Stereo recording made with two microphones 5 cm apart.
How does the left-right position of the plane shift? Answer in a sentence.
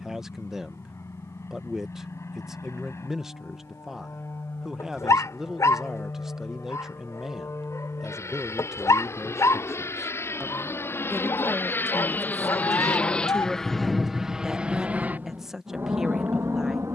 You can hear the plane move to the right.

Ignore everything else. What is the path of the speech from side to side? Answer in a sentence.
You can hear the speech stay put.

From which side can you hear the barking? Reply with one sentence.
You can hear the barking on the left.